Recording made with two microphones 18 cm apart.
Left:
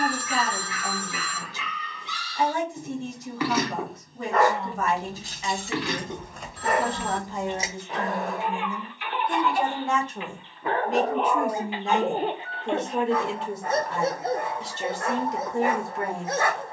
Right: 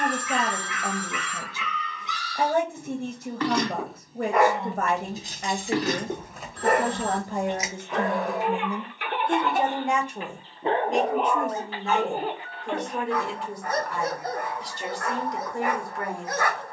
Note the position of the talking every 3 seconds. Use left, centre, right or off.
right, right, right, centre, left, left.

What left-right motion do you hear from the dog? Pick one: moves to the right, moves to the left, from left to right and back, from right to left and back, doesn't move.
from left to right and back.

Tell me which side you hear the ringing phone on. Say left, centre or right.
centre.